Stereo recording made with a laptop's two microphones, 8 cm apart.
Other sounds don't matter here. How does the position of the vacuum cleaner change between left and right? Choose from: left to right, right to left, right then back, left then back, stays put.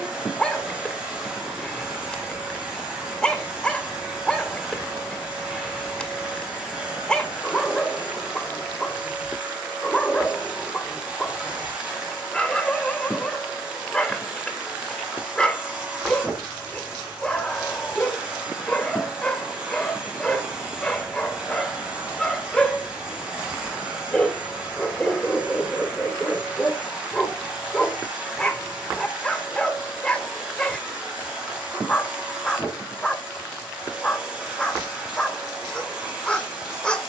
stays put.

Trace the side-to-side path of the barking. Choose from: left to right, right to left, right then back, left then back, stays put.
stays put.